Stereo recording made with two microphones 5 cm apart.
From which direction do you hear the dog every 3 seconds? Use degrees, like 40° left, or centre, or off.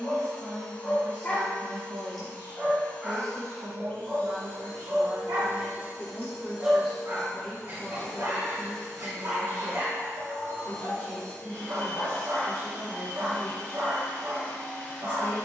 10° left, 30° right, 50° right, 50° right, 50° right.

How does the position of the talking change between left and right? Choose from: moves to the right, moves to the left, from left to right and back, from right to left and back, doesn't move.
moves to the left.